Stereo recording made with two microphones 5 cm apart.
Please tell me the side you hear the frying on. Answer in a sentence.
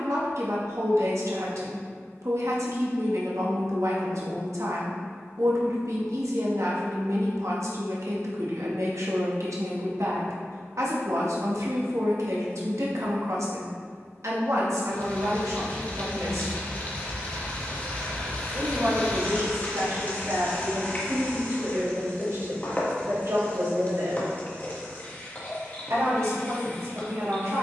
You can hear the frying on the left.